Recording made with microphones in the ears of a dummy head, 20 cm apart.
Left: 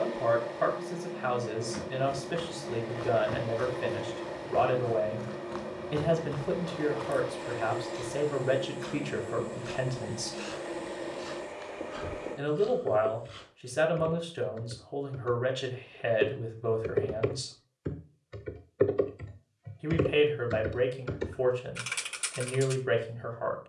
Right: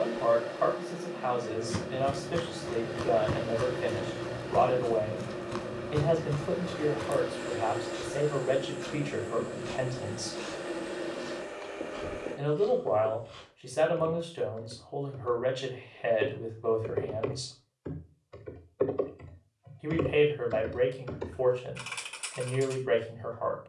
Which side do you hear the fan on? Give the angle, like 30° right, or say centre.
10° right.